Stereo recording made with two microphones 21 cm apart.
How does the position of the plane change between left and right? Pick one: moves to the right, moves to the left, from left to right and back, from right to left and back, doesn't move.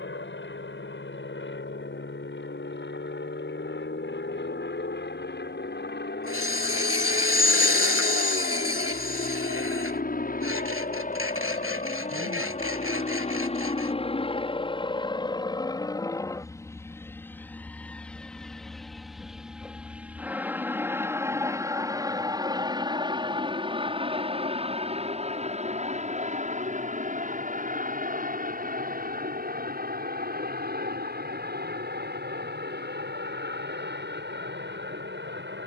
moves to the right.